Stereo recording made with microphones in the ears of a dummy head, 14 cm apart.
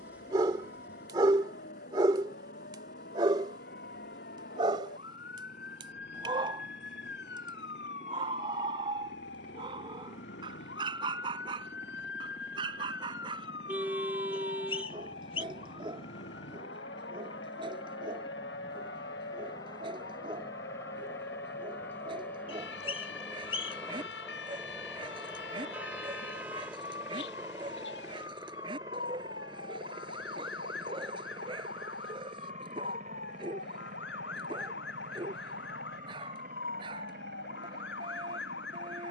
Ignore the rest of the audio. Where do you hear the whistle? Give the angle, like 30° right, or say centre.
40° left.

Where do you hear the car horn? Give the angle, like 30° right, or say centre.
10° right.